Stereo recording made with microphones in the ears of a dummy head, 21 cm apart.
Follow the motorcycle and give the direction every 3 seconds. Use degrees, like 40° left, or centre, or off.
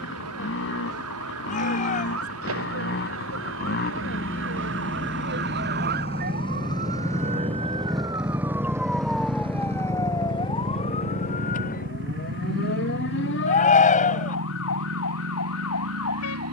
50° left, 40° left, 10° left, 40° right, 60° right, 70° right.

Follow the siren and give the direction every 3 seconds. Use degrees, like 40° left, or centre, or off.
70° right, 50° right, 20° right, 20° left, 50° left, 60° left.